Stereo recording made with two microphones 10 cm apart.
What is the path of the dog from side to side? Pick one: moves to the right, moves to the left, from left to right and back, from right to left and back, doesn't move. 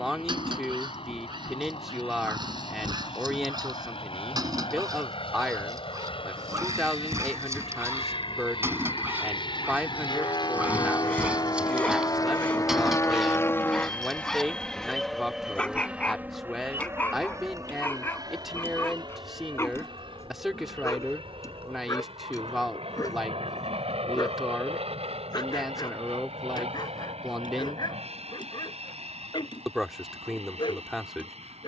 moves to the left.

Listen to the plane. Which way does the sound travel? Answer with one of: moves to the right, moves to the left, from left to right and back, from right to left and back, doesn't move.
moves to the right.